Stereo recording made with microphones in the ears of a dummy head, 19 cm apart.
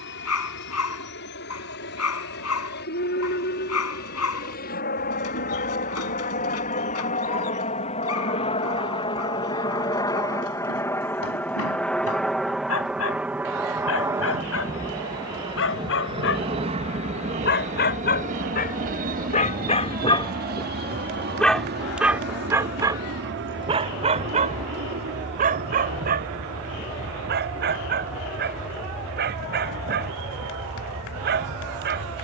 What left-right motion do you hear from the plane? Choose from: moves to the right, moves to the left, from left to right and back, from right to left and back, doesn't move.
moves to the right.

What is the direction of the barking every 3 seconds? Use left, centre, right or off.
left, left, left, left, left, left, left, centre, right, right, right.